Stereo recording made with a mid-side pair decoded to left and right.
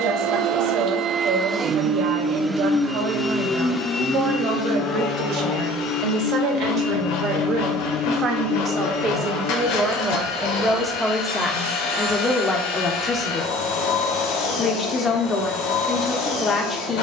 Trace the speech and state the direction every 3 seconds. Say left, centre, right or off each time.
right, right, right, centre, left, left.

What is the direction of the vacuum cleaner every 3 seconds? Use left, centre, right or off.
right, left, left, left, left, left.